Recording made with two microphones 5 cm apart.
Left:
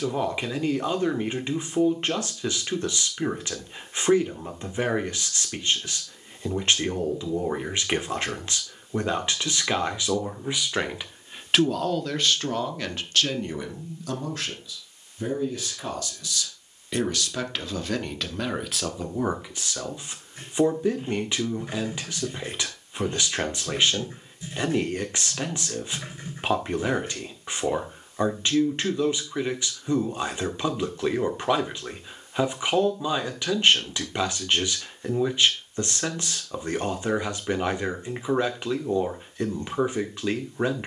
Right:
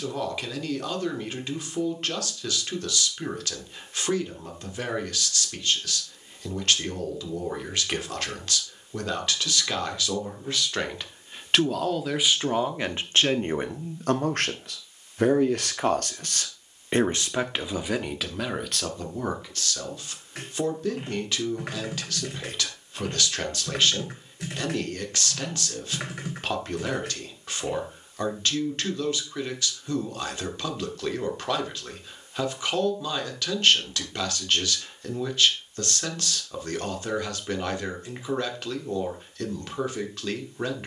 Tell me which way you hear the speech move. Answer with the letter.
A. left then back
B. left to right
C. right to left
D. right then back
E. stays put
D.